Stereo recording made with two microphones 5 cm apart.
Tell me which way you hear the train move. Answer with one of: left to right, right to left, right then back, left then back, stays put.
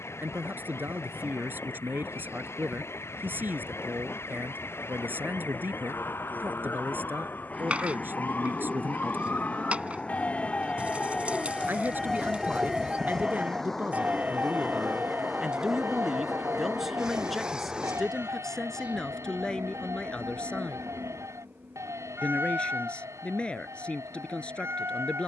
left to right.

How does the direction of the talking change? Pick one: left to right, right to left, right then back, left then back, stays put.
right to left.